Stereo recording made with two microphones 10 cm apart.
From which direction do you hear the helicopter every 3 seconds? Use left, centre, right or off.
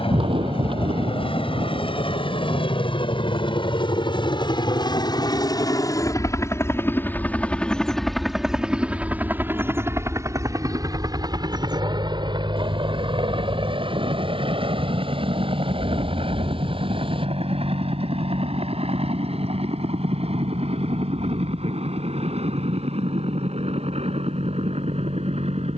left, left, centre, right, right, right, right, right, right.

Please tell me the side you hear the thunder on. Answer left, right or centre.
right.